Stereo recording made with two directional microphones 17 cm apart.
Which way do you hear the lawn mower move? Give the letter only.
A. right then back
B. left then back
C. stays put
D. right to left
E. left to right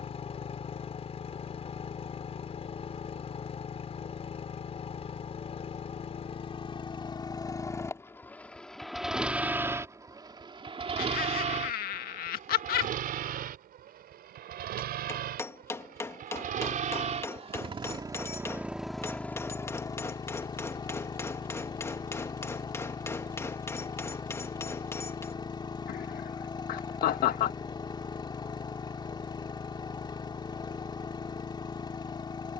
A.